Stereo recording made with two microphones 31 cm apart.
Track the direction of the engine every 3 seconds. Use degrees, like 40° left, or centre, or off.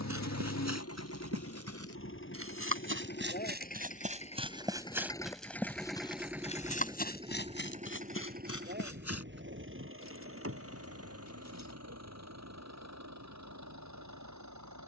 40° left, 20° left, 20° right, 40° right, 60° right.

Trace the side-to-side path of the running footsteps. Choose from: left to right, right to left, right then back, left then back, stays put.
right to left.